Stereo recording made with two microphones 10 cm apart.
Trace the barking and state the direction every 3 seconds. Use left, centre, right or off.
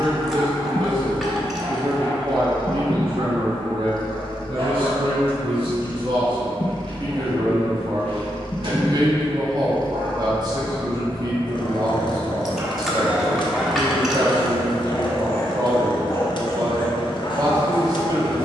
right, right, right, right, centre, left.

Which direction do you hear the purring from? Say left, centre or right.
left.